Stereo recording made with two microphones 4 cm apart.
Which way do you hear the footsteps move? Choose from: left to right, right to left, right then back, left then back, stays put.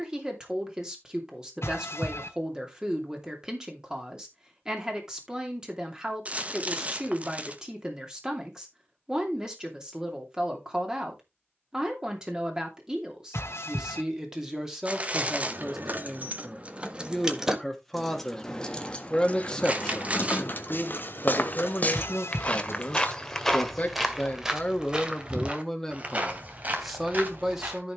left to right.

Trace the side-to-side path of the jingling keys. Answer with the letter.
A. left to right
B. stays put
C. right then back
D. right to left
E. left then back
D.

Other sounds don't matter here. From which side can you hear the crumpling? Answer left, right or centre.
right.